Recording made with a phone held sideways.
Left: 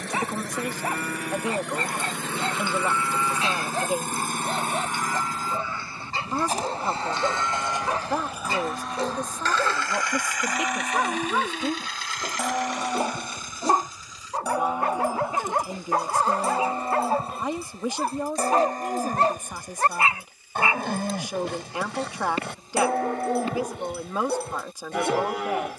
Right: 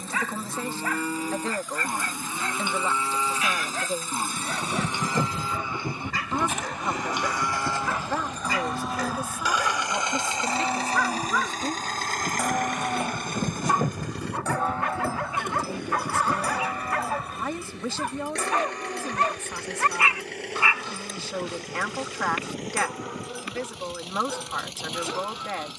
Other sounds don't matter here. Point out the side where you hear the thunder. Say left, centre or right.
right.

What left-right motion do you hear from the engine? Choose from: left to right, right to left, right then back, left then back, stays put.
left to right.